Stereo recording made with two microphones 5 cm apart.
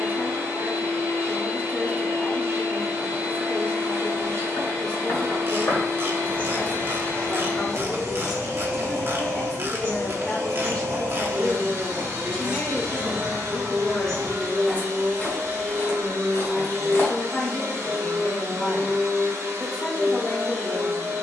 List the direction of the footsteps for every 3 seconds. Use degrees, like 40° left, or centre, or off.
off, 50° left, centre, 40° right, 10° right, 40° left, off.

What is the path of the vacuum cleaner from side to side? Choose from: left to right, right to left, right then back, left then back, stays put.
stays put.